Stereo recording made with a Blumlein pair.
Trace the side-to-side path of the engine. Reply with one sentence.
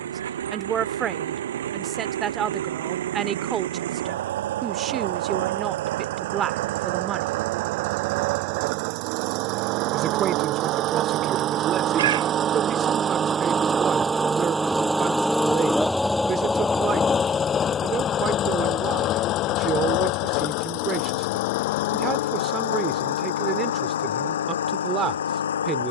You can hear the engine go from the right side to the left.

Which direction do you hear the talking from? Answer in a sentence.
In this clip you hear the talking on the right.